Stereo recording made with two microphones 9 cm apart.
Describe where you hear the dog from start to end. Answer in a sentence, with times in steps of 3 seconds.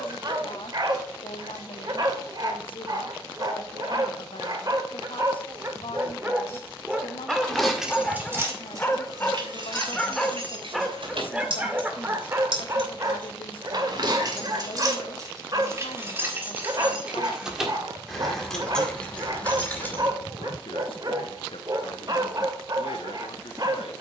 In this clip you hear the dog on the right from 0 s, in the centre from 6 s and on the right from 12 s.